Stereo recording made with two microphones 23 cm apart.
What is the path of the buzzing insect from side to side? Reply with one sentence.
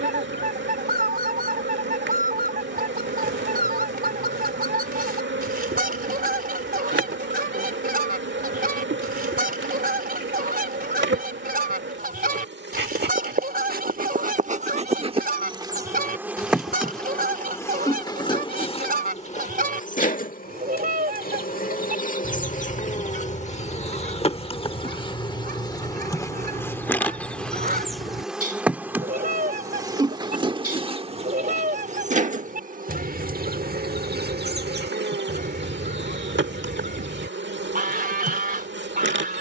You can hear the buzzing insect move from right to left and back again.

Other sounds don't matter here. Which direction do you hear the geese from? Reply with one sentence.
In this clip you hear the geese on the right.